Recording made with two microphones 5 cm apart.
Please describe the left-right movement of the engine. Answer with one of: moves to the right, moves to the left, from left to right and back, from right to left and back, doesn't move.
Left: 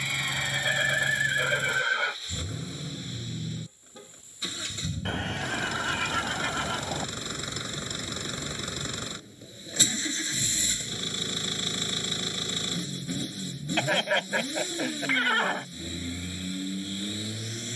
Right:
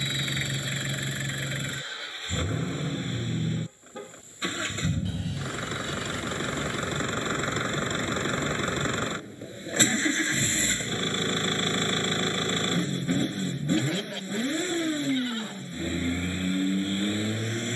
doesn't move.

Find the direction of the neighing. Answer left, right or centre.
left.